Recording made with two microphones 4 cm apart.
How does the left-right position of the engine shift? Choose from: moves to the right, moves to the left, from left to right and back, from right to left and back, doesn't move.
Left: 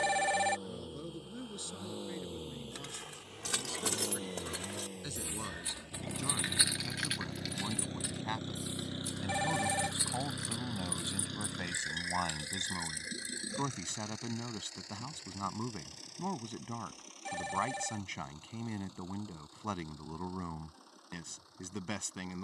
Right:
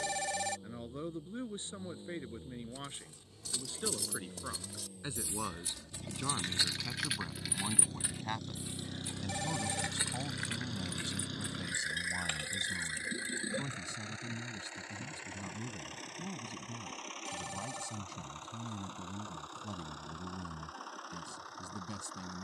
moves to the right.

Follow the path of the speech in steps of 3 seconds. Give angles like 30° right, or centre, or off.
30° right, 30° right, 10° right, 30° left, 60° left, 60° left, 60° left, 60° left.